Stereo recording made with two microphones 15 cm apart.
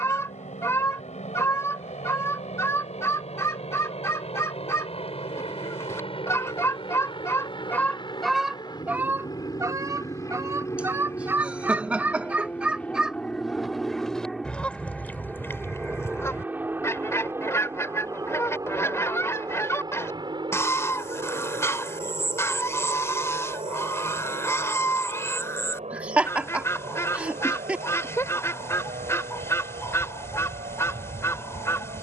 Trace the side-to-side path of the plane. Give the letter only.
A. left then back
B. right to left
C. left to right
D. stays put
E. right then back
C.